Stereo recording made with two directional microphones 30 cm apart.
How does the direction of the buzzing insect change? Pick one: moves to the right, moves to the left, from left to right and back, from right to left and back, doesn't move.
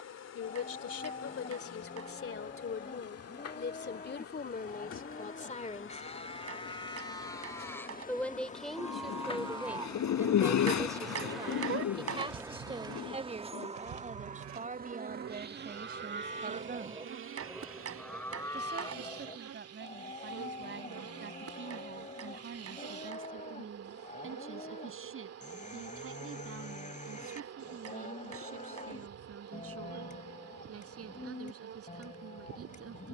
moves to the right.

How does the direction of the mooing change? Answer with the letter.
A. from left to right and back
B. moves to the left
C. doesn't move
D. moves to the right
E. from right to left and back
A.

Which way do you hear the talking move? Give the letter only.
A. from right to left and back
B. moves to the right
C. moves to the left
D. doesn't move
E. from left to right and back
B.